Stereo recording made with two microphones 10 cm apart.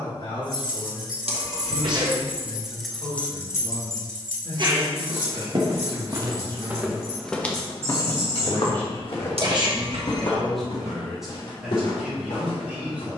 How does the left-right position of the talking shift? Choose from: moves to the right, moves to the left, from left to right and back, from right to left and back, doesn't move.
moves to the right.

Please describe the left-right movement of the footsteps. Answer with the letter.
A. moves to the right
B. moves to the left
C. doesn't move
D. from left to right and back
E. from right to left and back
B.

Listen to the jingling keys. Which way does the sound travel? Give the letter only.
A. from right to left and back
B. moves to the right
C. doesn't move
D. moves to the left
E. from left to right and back
D.